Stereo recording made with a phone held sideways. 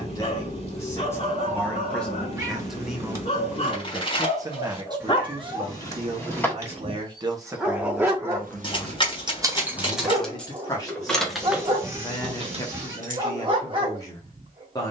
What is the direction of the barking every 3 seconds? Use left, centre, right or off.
left, left, centre, right, right.